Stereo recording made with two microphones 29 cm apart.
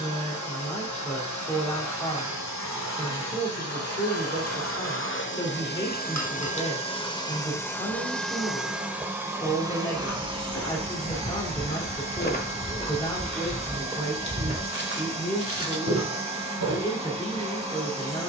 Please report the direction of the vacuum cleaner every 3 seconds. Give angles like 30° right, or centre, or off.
70° left, 50° left, 10° left, 20° right, 20° right, 20° right.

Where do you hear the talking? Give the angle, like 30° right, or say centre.
20° left.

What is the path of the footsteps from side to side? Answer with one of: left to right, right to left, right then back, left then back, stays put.
left to right.